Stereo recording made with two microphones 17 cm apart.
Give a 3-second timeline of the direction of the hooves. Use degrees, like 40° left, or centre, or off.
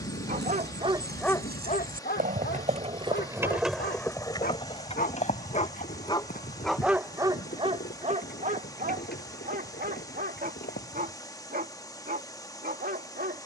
60° right, 20° left, 60° left, 70° left, off.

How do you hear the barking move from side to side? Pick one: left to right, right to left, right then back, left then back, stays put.
left then back.